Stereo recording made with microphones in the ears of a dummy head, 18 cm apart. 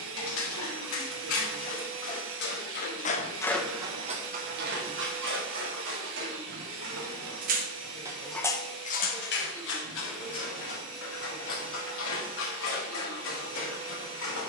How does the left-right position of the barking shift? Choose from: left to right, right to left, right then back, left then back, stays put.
right then back.